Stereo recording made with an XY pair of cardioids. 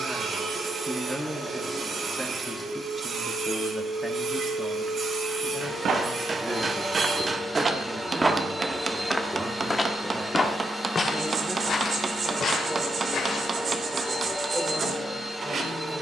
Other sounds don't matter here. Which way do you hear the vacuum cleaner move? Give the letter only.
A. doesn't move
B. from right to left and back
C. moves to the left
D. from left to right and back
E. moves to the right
A.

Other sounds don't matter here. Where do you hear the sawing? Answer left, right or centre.
right.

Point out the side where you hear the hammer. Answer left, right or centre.
right.